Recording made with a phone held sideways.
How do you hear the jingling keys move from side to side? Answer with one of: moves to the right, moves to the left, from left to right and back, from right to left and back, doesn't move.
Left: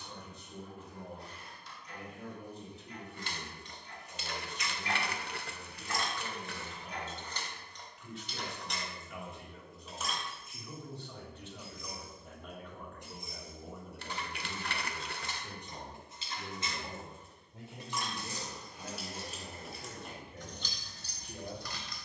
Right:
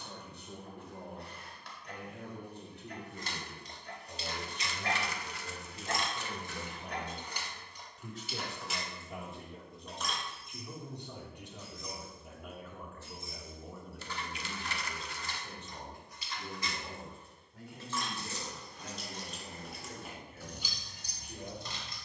from right to left and back.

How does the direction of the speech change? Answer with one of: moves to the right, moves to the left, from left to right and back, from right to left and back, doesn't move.
moves to the left.